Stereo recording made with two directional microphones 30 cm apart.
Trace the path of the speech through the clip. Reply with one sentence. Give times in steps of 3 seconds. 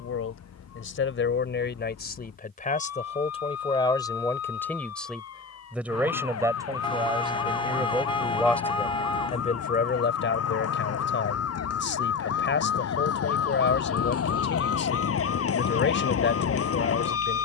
You can hear the speech on the left from 0 s, in the centre from 3 s and on the left from 9 s.